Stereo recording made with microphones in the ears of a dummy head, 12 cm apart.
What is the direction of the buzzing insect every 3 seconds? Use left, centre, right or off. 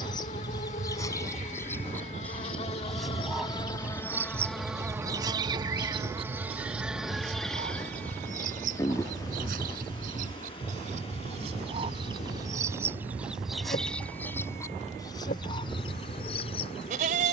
left, centre, centre, left, left, left.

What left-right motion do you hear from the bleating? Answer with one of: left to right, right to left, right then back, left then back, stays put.
stays put.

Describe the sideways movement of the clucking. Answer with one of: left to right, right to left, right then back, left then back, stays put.
right then back.